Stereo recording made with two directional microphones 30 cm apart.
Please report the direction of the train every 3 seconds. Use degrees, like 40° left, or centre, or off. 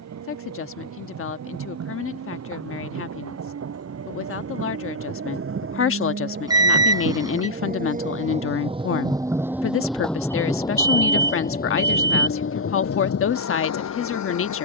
50° right, 50° right, 30° right, 10° left, 50° left.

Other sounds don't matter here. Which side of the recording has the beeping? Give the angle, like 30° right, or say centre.
10° right.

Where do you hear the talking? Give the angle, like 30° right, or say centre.
40° left.